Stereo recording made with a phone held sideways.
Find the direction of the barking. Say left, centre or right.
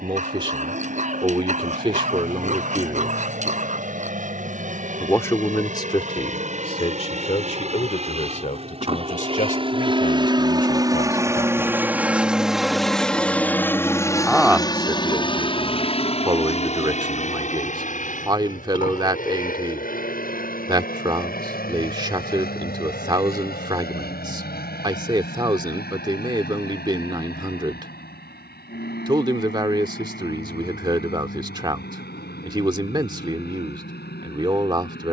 right.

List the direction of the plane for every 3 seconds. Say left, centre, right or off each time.
right, right, right, right, centre, left, left, left, left, left, left, left.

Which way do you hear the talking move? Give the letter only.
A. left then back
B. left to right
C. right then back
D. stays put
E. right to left
A.